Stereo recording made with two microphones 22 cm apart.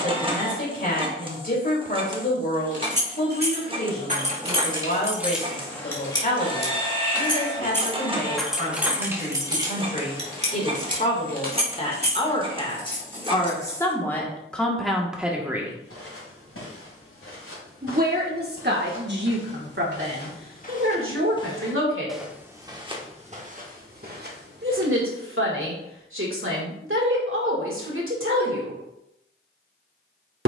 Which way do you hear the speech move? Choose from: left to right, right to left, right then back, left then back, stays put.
left to right.